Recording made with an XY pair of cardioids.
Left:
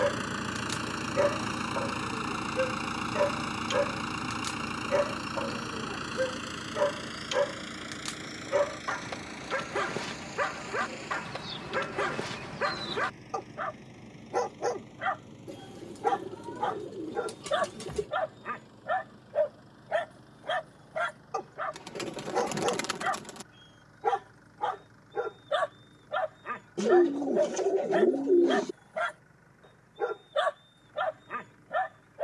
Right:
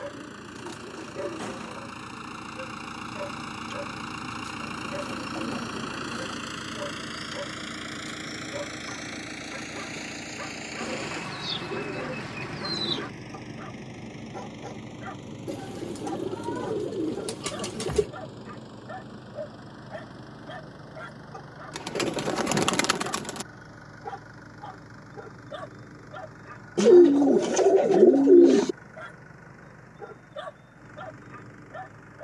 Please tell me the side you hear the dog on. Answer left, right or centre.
left.